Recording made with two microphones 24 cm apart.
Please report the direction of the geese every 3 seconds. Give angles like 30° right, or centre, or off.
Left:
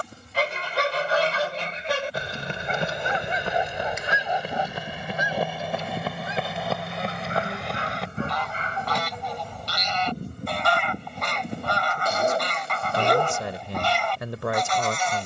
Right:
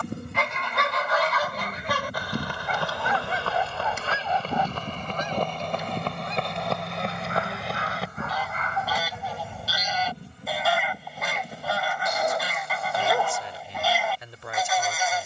30° left, 10° left, centre, 10° right, 10° right.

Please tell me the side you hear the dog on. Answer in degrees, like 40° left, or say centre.
30° left.